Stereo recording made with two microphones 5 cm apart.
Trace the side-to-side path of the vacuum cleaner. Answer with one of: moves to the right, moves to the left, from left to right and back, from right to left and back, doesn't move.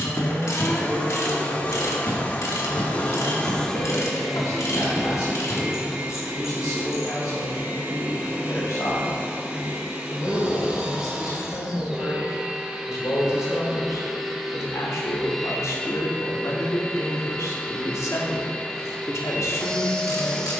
from left to right and back.